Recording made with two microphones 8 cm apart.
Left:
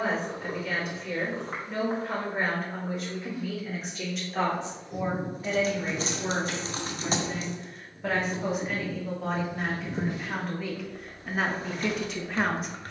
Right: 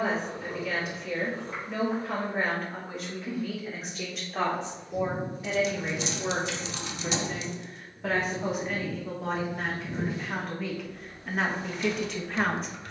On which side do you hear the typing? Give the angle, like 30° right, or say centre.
40° left.